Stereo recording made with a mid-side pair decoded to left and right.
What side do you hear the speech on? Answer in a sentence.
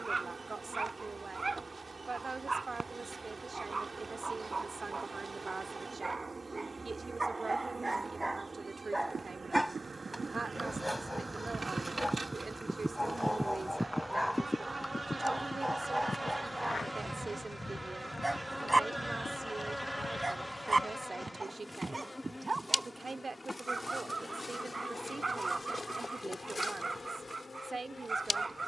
In this clip you hear the speech on the right.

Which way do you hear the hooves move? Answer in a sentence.
In this clip you hear the hooves travel towards the left.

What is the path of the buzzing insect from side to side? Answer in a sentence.
In this clip you hear the buzzing insect go from the right side to the left.